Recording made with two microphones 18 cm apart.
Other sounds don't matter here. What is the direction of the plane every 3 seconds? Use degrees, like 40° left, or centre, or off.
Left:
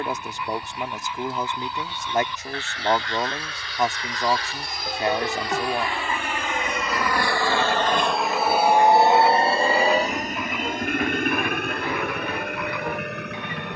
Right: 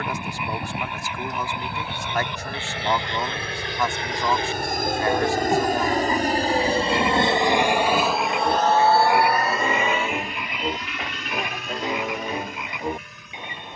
70° right, 60° right, 20° right, 40° left, 60° left.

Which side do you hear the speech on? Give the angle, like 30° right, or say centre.
20° left.